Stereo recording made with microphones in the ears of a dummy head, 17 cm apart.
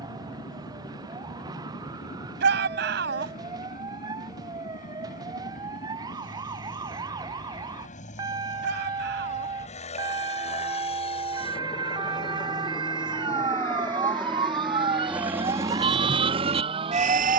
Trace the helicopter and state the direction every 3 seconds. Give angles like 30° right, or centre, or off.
50° left, 50° left, 40° left, 40° left, 10° left, 30° right.